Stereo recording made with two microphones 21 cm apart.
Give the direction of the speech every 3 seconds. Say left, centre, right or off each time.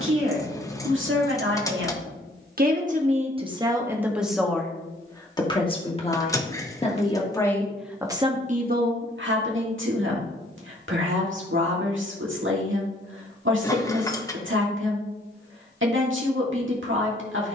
right, centre, centre, right, right, right.